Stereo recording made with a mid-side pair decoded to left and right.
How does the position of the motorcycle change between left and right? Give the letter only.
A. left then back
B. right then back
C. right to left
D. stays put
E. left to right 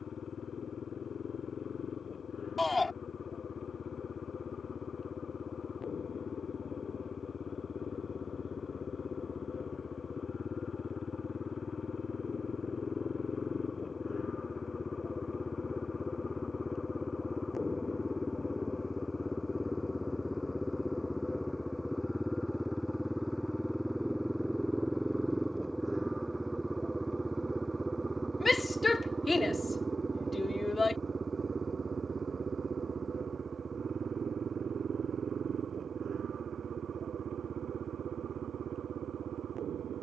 E.